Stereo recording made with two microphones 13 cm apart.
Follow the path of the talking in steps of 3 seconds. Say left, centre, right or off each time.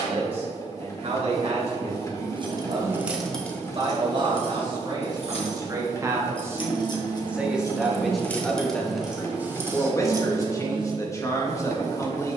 right, right, centre, left.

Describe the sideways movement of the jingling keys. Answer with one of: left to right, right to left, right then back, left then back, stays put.
left then back.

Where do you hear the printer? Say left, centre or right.
left.